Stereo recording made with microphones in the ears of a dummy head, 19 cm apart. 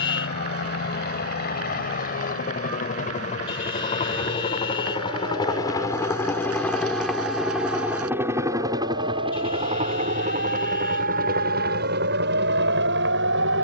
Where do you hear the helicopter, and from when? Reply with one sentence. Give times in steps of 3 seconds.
You can hear the helicopter on the left from 0 s, in the centre from 6 s and on the right from 9 s.